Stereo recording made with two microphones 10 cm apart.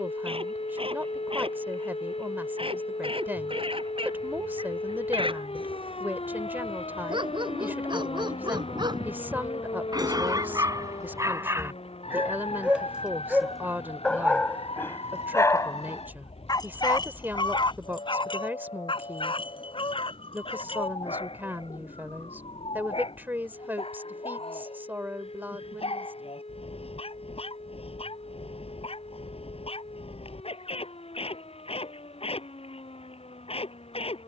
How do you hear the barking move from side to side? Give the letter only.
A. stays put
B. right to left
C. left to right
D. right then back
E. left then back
B.